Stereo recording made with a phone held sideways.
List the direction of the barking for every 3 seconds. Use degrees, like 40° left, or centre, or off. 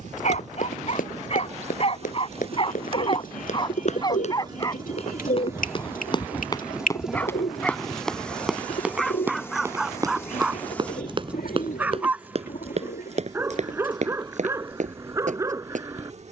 40° left, 20° left, 10° left, centre, 20° right, 20° right.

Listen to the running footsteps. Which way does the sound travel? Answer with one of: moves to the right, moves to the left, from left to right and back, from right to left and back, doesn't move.
moves to the right.